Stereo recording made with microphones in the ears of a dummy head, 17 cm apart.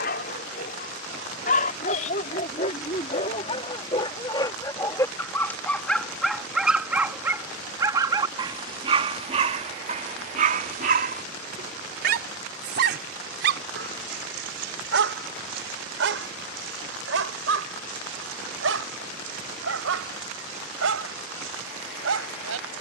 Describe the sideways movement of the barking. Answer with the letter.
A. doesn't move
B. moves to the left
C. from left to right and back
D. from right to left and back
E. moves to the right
E.